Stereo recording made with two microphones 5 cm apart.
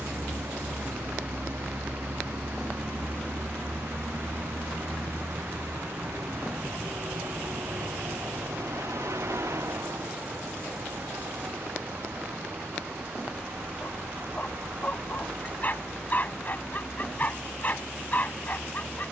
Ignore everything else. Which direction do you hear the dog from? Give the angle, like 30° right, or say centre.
40° left.